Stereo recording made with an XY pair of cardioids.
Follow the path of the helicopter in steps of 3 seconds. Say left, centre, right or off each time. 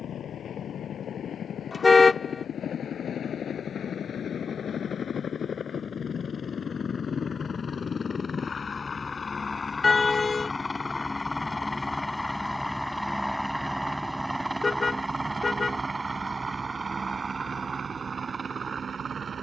left, left, left, left, centre, right, right.